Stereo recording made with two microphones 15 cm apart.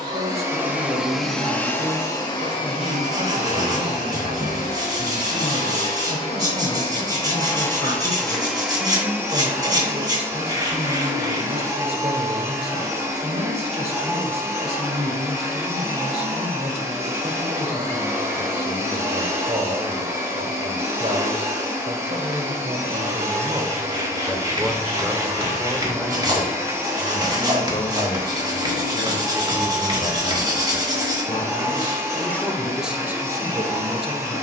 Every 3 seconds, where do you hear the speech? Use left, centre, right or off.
right, right, right, right, right, right, right, right, centre, left, left, right.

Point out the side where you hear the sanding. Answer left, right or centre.
right.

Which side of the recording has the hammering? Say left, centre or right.
right.